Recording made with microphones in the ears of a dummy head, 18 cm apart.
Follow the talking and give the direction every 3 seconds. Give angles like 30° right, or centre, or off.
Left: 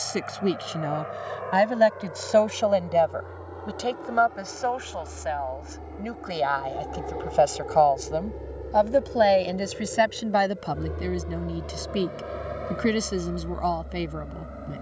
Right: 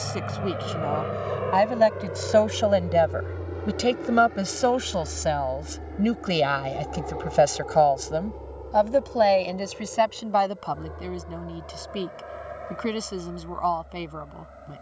10° left, 50° right, 20° right, 20° left, 20° left.